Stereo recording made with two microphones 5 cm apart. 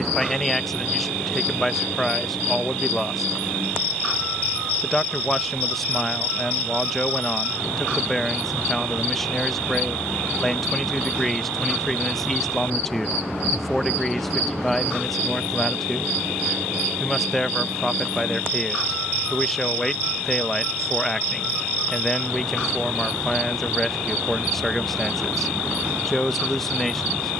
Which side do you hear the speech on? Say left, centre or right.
centre.